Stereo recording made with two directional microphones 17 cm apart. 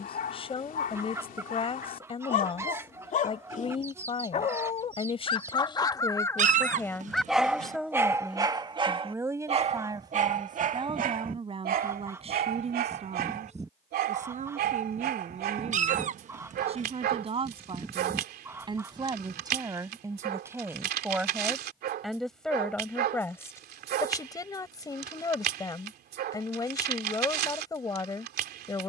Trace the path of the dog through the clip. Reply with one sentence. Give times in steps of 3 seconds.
You can hear the dog on the left from 0 s, in the centre from 6 s and on the right from 9 s.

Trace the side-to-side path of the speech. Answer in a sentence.
You can hear the speech move from left to right and back again.